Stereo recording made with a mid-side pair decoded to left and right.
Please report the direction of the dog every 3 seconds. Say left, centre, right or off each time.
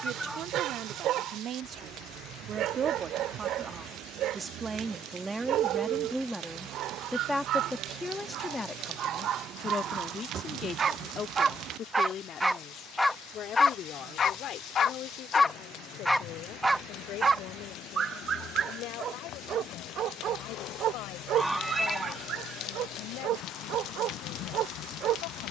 right, right, right, right, centre, centre, right, right, right.